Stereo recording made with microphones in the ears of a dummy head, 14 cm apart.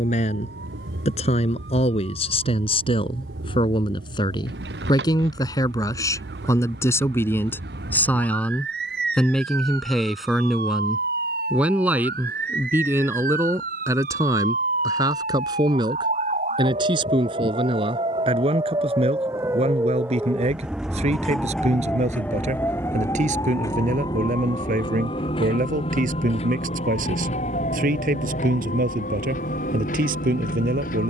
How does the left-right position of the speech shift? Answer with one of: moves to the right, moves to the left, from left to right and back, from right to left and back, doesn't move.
moves to the right.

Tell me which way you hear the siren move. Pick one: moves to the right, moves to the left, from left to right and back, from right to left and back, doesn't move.
moves to the left.